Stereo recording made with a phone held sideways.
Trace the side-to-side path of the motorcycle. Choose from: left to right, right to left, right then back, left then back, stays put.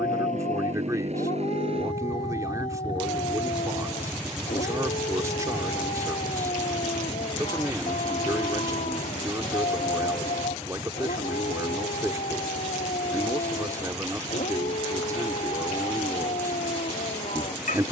right to left.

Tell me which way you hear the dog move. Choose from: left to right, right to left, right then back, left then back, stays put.
stays put.